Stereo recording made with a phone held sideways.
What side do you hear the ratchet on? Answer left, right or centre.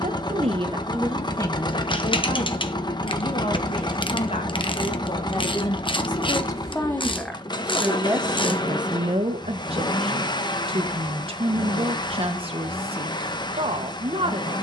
left.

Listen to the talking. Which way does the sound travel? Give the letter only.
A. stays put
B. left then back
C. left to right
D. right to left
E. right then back
B.